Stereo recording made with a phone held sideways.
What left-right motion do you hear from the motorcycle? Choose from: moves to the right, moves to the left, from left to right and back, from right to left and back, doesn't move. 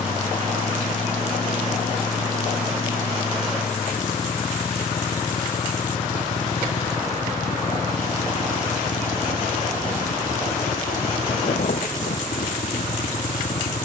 doesn't move.